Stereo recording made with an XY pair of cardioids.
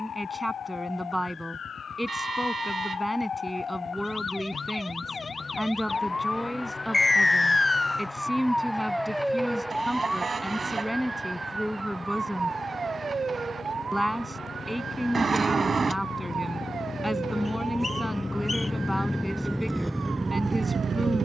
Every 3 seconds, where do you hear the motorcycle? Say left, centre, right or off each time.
left, left, left, left, left, left, centre.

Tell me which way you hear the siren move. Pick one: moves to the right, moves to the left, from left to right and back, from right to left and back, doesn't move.
moves to the right.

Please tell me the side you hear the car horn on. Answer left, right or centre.
right.